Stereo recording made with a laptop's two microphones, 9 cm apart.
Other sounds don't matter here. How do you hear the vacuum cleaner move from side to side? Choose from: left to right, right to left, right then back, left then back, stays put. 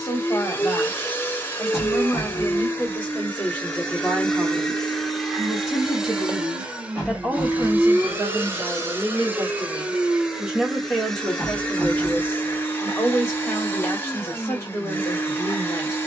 right then back.